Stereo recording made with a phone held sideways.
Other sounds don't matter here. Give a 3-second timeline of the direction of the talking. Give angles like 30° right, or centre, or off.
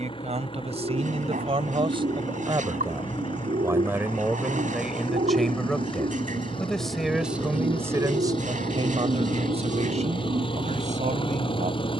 50° right, 10° right, 20° right, 60° right.